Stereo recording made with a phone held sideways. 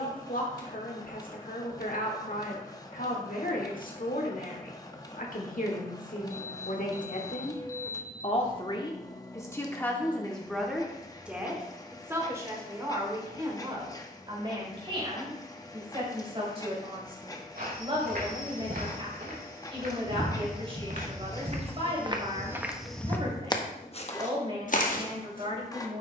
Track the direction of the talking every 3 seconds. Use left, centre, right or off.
left, left, left, centre, right, right, right, right, right.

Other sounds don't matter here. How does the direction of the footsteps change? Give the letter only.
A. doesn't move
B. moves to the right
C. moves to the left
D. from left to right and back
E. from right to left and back
C.